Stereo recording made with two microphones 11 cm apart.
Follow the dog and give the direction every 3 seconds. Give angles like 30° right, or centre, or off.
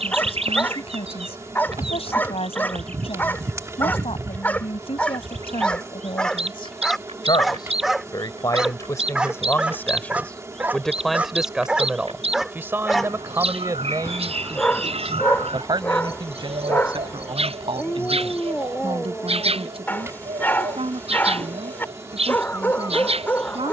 20° left, 10° left, centre, 10° right, 10° left, 20° left, 20° left, 20° left.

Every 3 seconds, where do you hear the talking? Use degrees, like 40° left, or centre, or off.
60° left, 60° left, 40° left, 10° left, 30° right, 50° right, 60° right, 60° right.